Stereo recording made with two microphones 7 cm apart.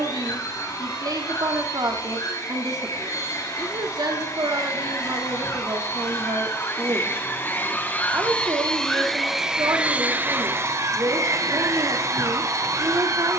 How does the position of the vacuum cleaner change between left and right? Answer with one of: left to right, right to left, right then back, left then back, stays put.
left to right.